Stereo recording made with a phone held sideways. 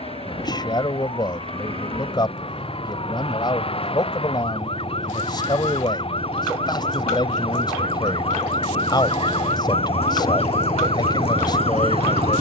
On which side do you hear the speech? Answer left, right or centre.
left.